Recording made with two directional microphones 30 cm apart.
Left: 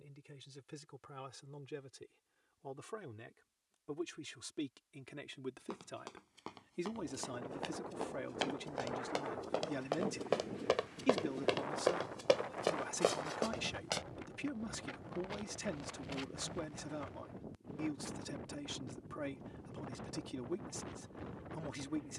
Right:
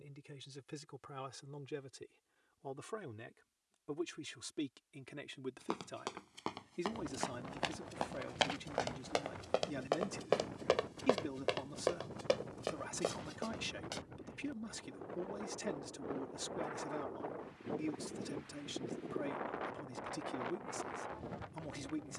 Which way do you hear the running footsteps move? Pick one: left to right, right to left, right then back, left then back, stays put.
right to left.